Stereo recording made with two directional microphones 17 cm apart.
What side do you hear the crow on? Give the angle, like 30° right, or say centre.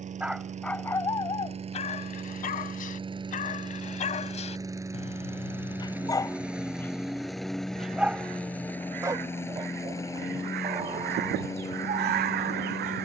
70° right.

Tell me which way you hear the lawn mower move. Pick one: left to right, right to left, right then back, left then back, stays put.
right to left.